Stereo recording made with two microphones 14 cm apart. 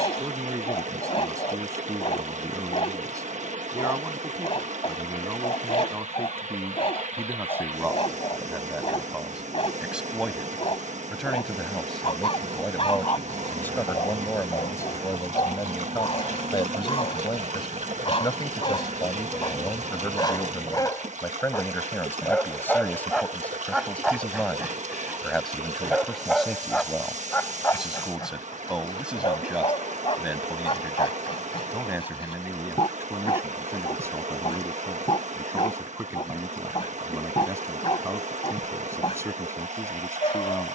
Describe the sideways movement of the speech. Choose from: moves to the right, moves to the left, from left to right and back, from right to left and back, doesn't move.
from right to left and back.